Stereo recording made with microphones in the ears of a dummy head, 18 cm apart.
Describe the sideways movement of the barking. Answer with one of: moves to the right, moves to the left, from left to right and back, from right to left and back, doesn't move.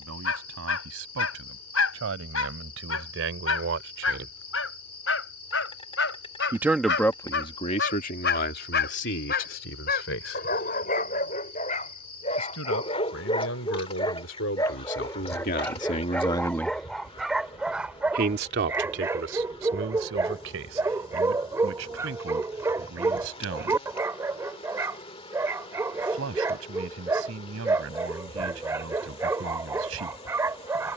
moves to the right.